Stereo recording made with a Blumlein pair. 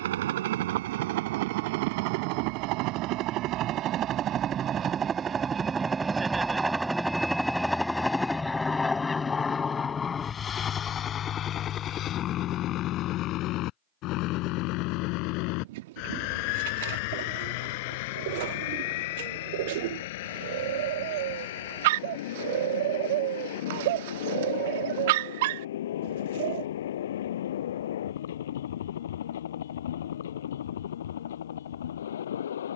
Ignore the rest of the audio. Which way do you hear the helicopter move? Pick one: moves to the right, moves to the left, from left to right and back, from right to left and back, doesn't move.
moves to the left.